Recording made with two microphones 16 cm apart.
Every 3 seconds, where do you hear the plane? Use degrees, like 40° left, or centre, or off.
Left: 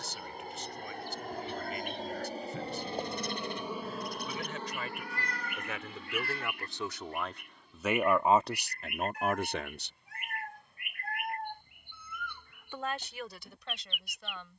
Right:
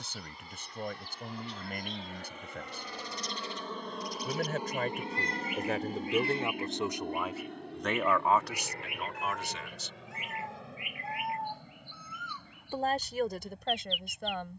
50° left, 10° right, 50° right, 70° right, 80° right.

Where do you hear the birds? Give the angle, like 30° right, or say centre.
50° left.